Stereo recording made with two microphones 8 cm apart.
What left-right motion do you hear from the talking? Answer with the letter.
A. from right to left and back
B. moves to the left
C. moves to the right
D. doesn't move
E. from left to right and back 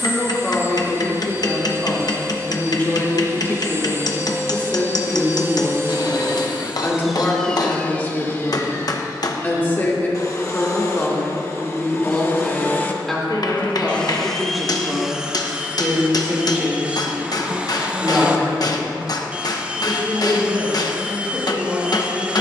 C.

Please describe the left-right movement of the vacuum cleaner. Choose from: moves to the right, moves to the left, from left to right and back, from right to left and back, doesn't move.
from right to left and back.